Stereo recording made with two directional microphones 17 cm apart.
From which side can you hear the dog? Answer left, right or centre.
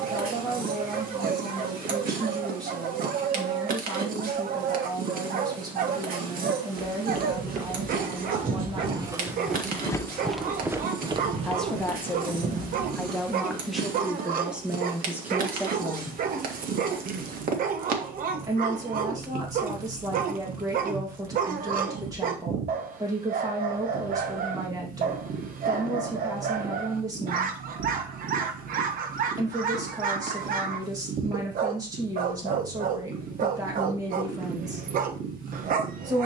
right.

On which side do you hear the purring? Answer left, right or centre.
right.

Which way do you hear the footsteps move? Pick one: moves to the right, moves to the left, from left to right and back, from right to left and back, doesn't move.
from right to left and back.